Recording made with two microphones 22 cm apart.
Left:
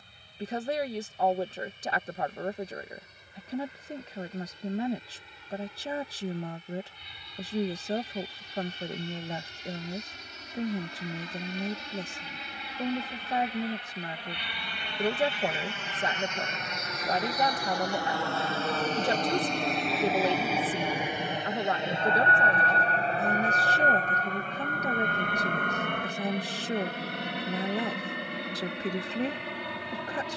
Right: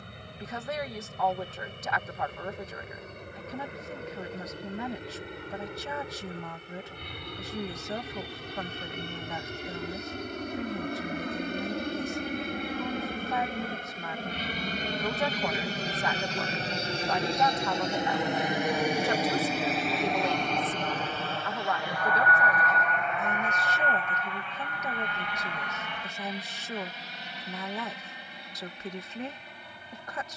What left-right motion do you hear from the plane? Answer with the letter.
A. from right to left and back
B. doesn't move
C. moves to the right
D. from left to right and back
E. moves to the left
E.